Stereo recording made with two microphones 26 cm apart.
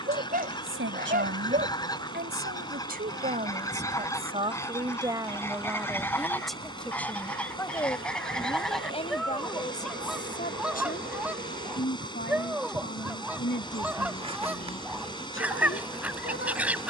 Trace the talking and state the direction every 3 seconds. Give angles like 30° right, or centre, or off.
40° right, 20° right, 10° left, 30° left, 40° left, 50° left.